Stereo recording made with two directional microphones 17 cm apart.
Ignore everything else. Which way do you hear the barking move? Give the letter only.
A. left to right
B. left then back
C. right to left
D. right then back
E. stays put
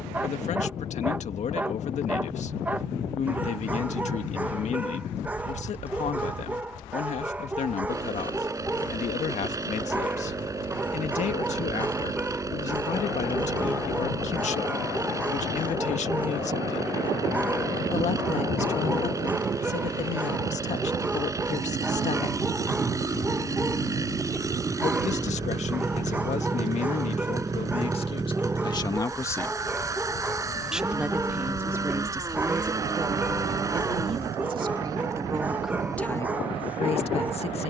E.